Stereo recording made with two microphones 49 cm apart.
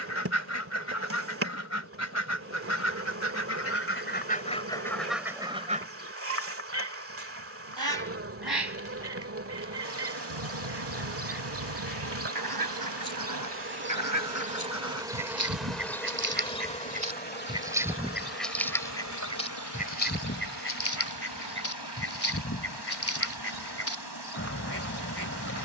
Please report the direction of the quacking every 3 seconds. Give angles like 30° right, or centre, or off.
30° left, 10° left, 40° right, 60° right, 40° right, 20° right, 10° left, 30° left, 30° left.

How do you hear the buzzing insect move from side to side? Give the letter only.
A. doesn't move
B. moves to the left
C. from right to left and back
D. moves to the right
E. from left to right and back
B.